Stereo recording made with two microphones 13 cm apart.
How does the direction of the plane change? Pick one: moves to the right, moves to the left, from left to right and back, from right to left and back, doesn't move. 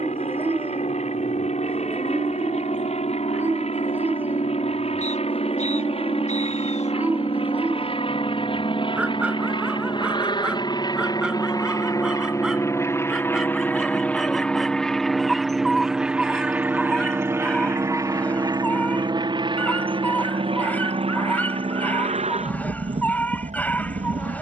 moves to the right.